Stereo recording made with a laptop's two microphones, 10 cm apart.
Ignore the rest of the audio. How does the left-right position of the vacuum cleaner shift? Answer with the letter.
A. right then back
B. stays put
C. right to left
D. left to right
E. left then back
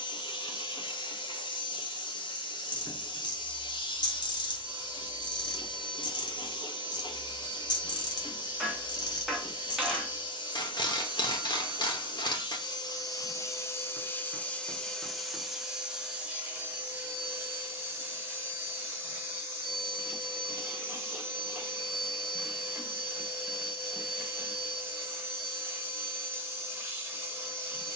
D.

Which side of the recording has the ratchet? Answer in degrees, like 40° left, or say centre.
50° left.